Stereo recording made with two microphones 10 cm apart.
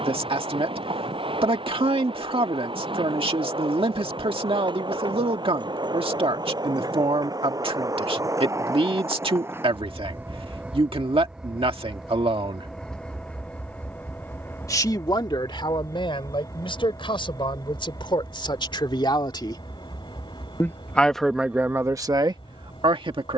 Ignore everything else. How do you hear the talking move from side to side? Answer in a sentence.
In this clip you hear the talking move from right to left and back again.